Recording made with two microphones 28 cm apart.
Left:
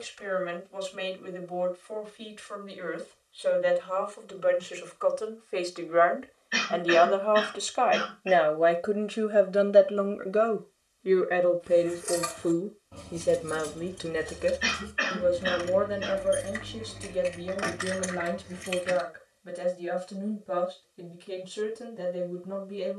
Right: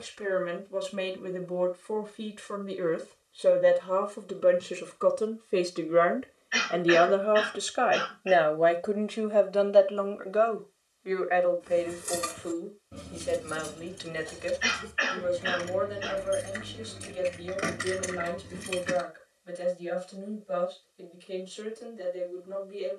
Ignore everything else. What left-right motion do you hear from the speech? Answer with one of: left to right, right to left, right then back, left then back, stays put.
right to left.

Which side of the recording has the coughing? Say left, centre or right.
left.